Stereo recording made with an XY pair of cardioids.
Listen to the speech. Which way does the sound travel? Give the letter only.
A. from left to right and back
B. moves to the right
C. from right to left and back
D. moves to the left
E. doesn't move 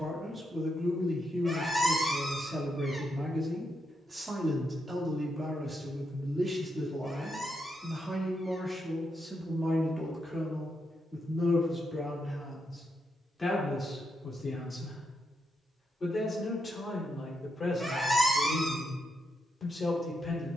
D.